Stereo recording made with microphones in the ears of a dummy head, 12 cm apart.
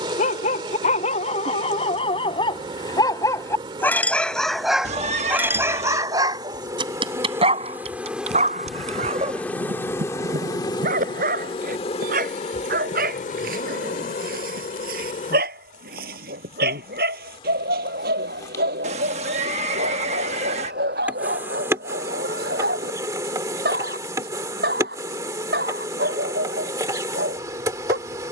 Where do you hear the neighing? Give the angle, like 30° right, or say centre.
50° right.